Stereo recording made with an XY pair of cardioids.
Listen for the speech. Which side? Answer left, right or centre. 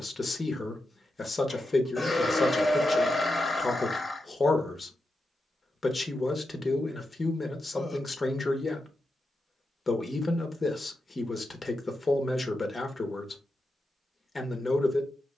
left.